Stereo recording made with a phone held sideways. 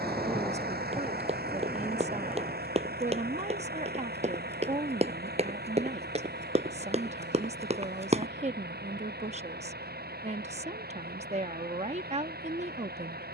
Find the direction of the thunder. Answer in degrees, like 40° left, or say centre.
centre.